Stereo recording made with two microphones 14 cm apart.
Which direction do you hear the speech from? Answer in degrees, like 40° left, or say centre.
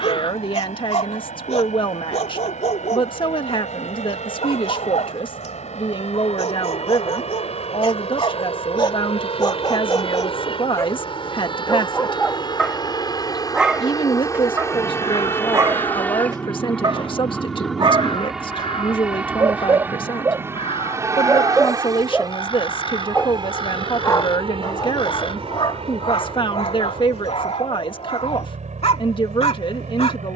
40° left.